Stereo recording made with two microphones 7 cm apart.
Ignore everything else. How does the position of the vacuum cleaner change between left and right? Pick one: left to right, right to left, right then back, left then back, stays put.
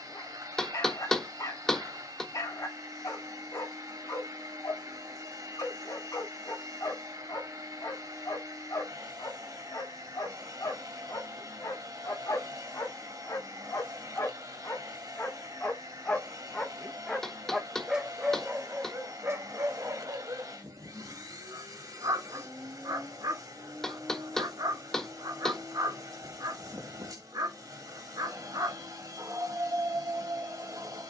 stays put.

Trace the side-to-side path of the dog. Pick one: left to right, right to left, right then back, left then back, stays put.
left to right.